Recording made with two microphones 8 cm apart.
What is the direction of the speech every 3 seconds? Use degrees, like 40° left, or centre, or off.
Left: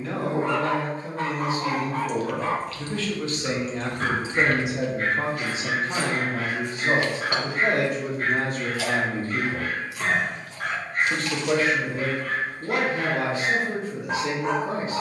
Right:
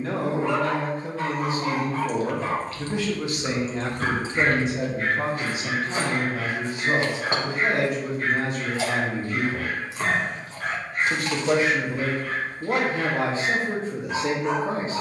40° right, 10° left, 40° left, centre, 30° right.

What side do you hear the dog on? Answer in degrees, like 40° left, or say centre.
50° left.